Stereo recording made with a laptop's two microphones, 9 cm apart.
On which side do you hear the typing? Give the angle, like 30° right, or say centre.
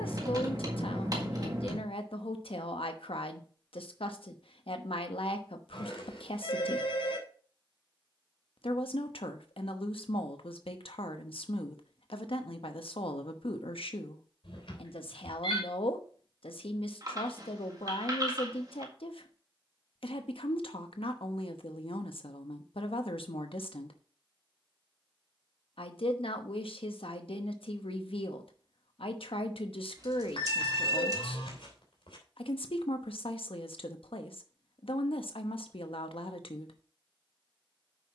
40° right.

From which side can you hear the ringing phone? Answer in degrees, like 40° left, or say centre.
70° left.